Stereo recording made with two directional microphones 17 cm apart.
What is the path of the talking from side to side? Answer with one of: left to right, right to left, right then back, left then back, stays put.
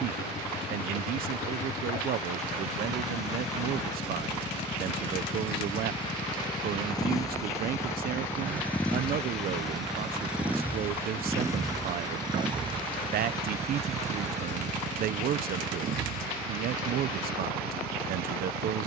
stays put.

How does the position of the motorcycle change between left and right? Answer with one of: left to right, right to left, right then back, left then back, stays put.
left to right.